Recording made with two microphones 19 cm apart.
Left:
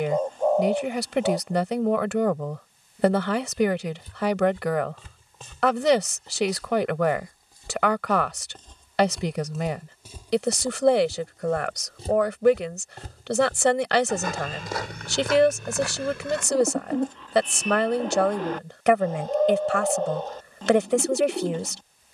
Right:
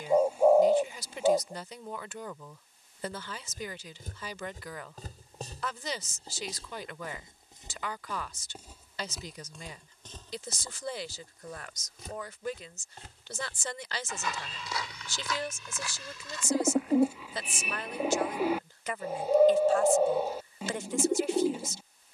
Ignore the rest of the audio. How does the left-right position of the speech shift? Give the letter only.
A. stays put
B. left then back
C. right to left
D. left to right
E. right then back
A.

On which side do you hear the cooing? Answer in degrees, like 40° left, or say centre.
10° right.